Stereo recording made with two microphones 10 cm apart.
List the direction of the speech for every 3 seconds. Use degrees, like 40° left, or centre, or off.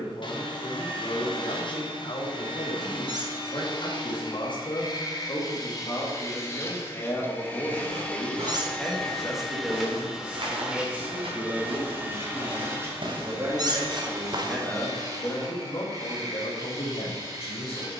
70° left, 50° left, 20° left, 10° right, 20° right, 60° left.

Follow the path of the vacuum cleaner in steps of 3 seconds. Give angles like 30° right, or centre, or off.
50° left, 40° left, 20° left, 10° right, 30° right, 40° right.